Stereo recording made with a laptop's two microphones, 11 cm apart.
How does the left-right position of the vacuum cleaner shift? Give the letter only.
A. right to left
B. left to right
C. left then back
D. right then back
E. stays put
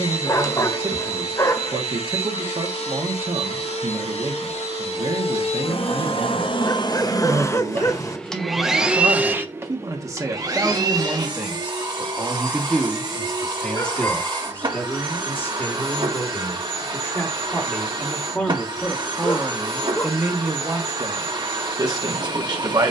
B.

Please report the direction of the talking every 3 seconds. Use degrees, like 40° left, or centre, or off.
50° right, 50° right, 50° right, 30° right, centre, 20° left, 10° right, 40° right.